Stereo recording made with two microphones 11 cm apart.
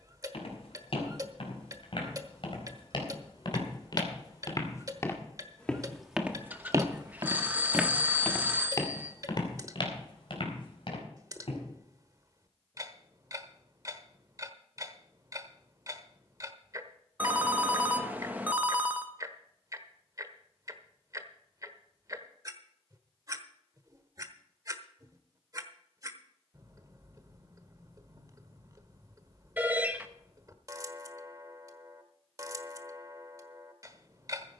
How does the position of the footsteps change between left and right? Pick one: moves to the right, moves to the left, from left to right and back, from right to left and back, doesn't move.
from left to right and back.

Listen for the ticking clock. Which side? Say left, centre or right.
right.